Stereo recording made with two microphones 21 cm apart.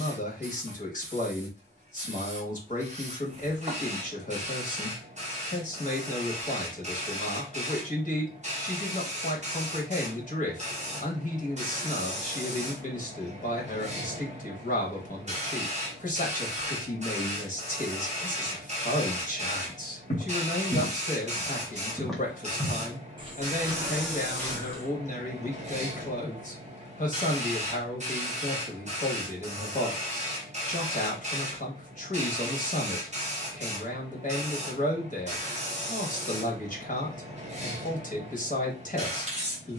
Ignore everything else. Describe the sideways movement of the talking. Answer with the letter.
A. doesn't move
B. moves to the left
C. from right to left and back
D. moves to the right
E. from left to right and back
A.